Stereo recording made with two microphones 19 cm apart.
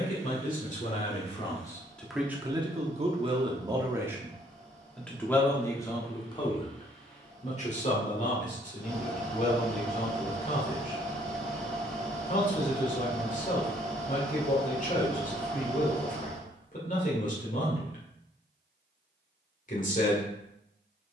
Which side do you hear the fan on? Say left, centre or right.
centre.